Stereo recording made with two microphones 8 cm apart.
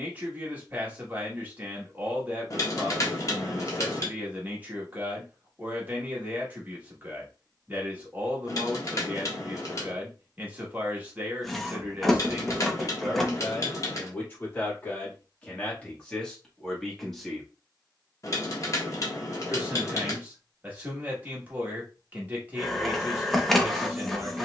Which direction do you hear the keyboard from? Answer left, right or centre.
left.